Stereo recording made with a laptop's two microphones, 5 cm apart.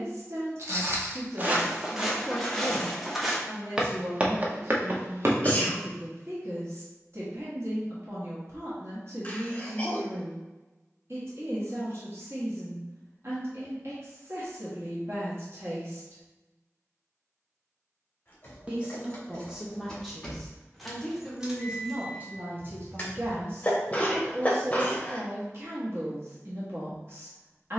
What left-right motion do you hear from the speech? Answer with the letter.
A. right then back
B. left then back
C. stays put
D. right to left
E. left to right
B.